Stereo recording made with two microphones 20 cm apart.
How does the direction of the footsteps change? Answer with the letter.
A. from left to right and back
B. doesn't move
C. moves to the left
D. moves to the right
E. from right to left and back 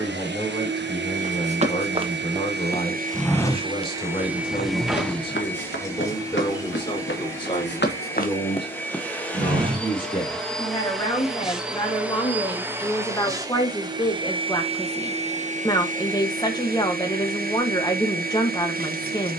E.